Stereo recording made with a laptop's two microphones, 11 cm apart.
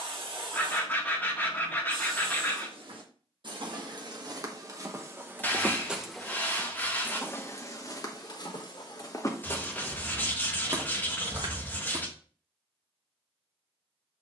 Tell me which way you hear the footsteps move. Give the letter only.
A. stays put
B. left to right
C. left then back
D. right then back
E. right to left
C.